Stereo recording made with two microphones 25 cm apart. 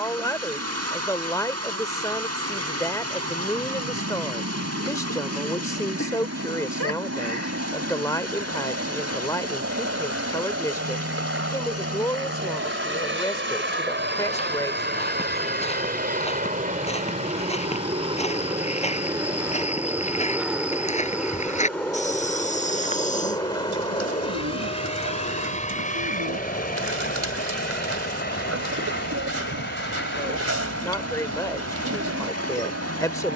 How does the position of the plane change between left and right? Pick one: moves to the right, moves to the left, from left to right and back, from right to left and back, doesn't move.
moves to the left.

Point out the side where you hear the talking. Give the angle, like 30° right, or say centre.
10° left.